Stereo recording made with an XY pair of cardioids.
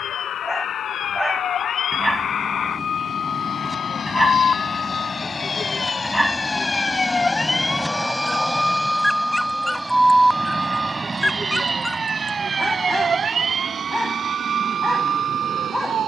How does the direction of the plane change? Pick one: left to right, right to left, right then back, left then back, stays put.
left to right.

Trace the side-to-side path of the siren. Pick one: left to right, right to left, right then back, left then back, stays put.
left to right.